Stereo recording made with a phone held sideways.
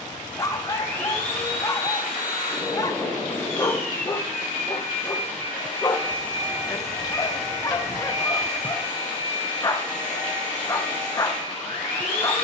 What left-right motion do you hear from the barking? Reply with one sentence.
In this clip you hear the barking stay put.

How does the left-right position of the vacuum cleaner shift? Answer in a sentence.
You can hear the vacuum cleaner stay put.